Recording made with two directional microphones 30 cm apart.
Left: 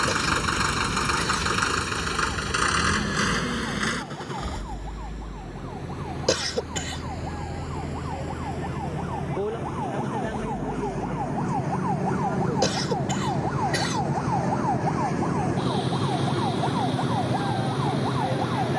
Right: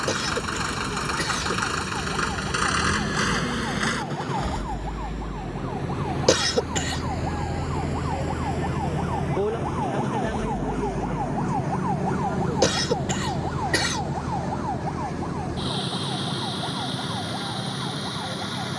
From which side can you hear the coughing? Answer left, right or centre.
right.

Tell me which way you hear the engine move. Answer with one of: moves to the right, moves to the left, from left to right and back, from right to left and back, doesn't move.
moves to the right.